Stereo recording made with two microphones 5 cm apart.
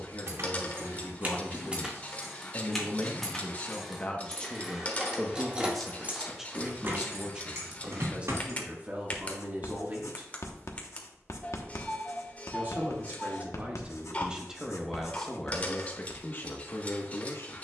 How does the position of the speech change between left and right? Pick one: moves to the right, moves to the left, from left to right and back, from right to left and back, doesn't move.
from left to right and back.